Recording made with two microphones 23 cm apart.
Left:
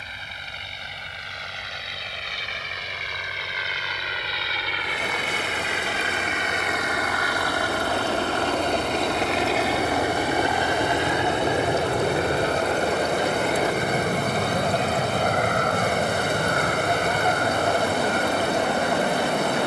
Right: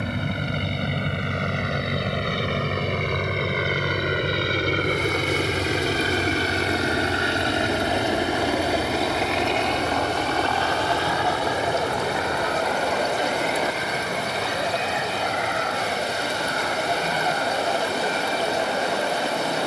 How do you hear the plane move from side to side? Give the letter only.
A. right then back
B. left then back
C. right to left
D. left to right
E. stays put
C.